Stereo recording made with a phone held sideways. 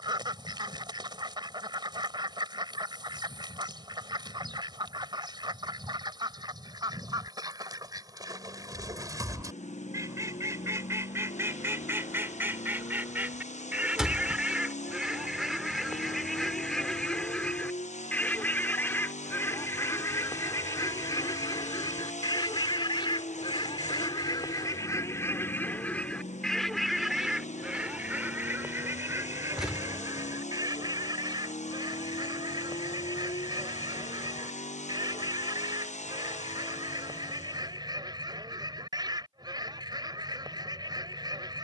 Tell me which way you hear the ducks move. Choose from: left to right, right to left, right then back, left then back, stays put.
left then back.